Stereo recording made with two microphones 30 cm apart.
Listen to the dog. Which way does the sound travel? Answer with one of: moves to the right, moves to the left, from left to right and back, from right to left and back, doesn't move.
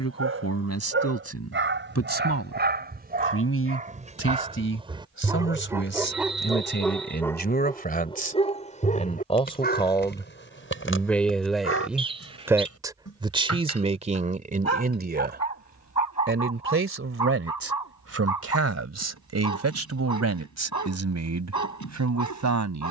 moves to the left.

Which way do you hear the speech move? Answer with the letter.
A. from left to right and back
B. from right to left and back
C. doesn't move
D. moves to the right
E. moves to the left
D.